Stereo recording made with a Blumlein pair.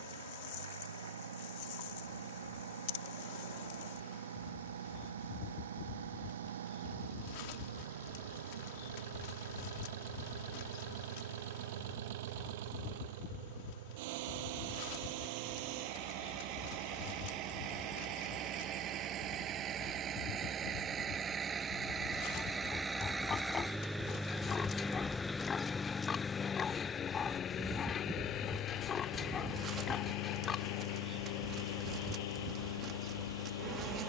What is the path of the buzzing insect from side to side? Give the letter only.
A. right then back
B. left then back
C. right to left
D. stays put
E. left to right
E.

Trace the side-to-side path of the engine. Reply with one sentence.
In this clip you hear the engine move from right to left.